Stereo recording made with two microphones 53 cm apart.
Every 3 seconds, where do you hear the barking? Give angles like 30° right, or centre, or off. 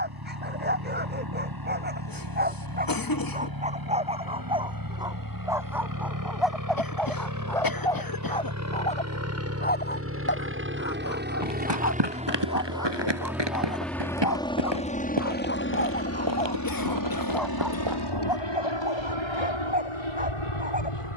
20° right, 10° right, centre, 20° left, 40° left, 20° left, 10° right.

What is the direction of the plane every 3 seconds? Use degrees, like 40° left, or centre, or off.
50° right, 40° right, 40° right, 20° right, centre, 30° left, 60° left.